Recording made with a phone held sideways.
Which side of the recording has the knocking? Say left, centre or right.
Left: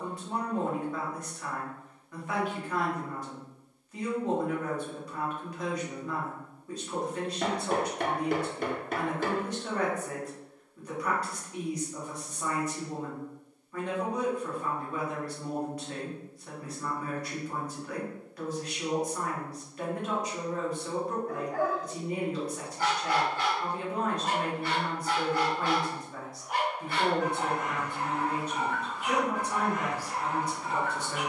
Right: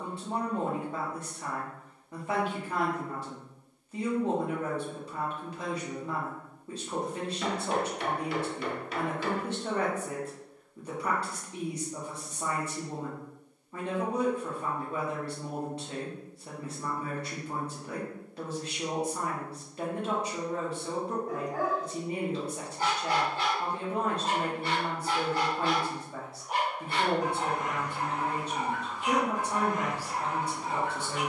left.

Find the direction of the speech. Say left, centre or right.
right.